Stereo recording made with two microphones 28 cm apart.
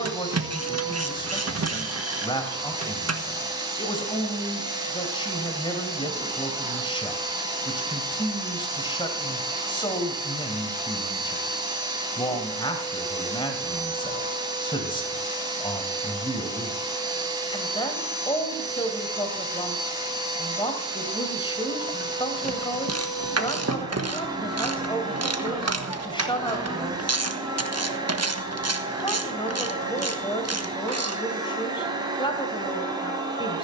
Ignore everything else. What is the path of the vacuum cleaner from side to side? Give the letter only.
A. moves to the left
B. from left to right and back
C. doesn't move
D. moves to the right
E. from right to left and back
C.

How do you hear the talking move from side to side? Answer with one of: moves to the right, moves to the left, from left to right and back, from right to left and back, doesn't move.
doesn't move.